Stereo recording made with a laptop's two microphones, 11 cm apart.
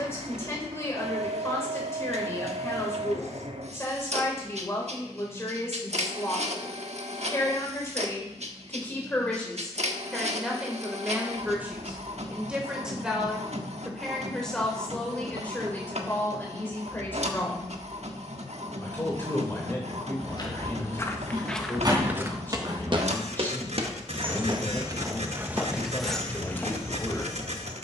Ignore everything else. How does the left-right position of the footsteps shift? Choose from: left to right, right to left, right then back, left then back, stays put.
right then back.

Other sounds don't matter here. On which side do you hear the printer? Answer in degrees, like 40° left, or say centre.
70° right.